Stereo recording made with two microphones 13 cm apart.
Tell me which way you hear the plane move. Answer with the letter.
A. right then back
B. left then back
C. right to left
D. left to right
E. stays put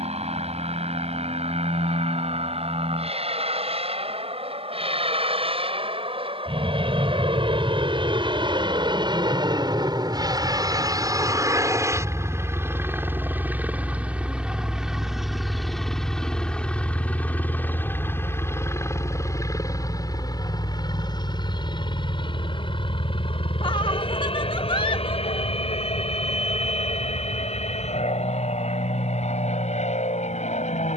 C.